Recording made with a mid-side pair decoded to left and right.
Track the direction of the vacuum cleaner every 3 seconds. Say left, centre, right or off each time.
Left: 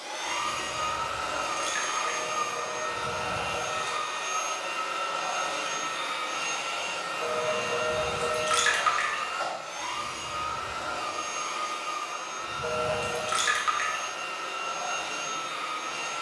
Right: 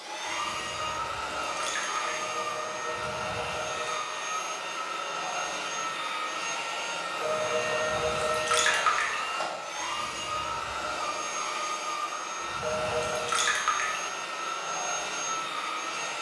left, left, centre, right, right, right.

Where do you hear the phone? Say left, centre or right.
right.